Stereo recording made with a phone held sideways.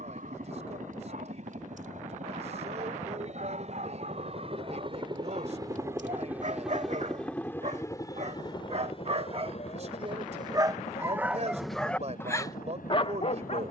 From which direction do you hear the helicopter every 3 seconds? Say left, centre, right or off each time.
right, right, centre, left, left.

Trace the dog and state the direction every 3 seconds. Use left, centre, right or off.
right, right, right, right, left.